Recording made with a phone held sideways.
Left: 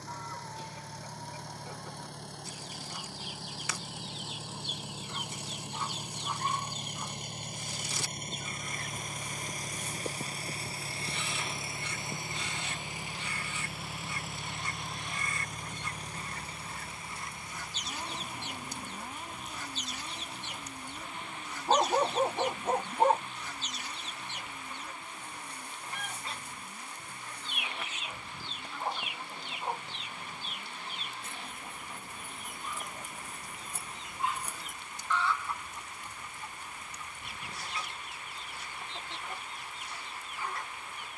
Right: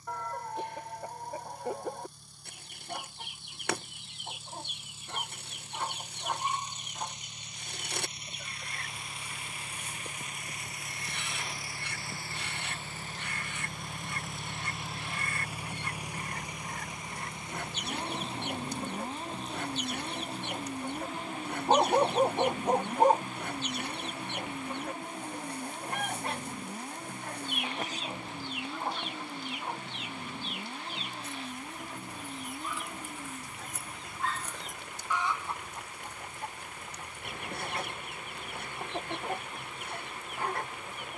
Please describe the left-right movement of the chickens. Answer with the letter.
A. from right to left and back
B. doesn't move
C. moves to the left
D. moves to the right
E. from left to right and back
A.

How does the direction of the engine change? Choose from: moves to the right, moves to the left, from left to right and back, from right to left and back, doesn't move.
moves to the right.